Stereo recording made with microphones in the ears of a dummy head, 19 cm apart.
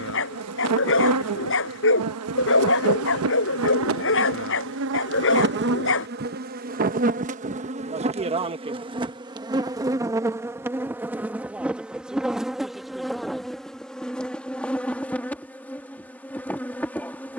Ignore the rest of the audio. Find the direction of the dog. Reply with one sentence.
In this clip you hear the dog on the left.